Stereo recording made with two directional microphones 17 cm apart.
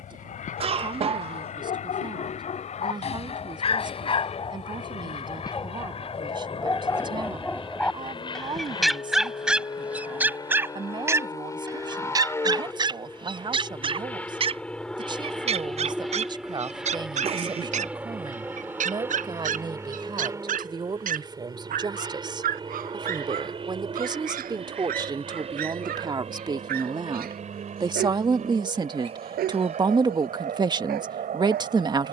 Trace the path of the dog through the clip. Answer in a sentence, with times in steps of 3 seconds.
You can hear the dog on the left from 0 s, in the centre from 6 s and on the right from 12 s.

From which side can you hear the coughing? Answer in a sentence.
In this clip you hear the coughing on the right.